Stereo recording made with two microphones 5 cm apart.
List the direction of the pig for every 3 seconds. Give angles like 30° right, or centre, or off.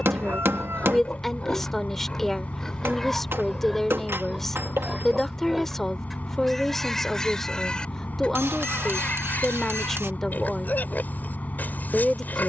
20° left, centre, 10° left, 40° left.